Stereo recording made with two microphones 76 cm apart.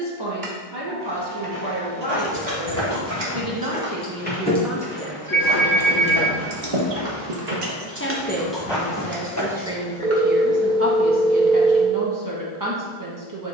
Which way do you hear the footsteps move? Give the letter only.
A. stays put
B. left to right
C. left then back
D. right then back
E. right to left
D.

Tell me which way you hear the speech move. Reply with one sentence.
In this clip you hear the speech go left and come back.